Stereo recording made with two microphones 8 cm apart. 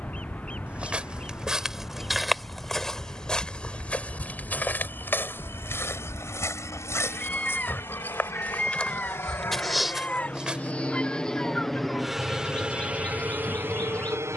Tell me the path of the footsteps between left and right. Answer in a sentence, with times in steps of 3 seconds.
You can hear the footsteps in the centre from 0 s, on the left from 3 s, in the centre from 9 s and not at all from 12 s.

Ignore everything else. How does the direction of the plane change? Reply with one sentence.
In this clip you hear the plane go from the left side to the right.